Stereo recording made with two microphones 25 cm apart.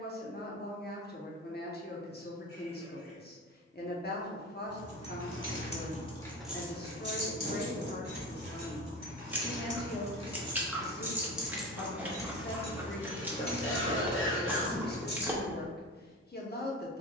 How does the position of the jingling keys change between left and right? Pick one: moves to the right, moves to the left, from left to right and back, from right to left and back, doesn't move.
from left to right and back.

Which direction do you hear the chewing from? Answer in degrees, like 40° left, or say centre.
10° right.